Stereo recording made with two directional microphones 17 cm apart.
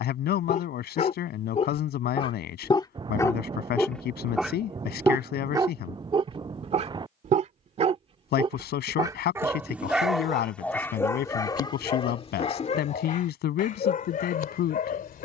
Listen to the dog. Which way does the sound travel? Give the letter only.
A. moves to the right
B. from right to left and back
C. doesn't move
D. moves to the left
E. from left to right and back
E.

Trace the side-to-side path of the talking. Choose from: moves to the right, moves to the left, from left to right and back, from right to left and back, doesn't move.
doesn't move.